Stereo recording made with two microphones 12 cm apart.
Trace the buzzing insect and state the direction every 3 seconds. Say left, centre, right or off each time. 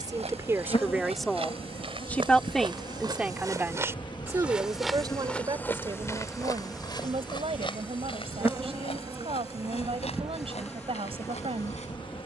left, left, centre, centre.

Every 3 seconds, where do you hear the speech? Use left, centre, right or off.
centre, right, right, right.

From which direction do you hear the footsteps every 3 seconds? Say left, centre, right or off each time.
right, centre, left, left.